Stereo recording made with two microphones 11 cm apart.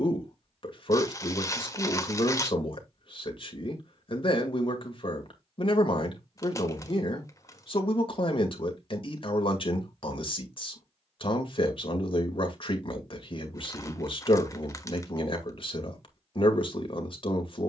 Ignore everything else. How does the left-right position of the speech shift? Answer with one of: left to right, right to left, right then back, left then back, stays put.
stays put.